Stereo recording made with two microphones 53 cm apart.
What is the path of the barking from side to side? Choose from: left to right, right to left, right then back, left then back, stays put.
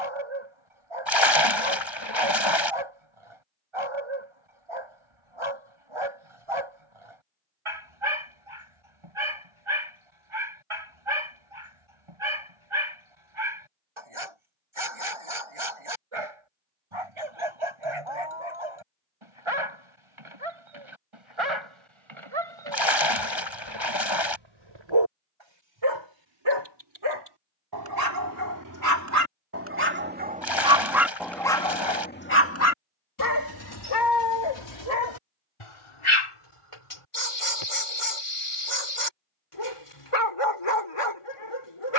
right to left.